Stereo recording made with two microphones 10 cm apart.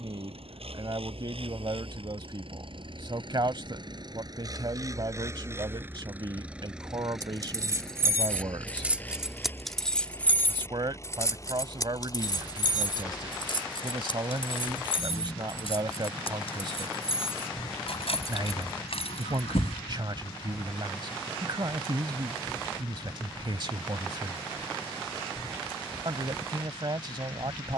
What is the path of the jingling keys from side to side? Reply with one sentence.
In this clip you hear the jingling keys move to the left.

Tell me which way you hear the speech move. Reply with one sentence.
You can hear the speech stay in one place.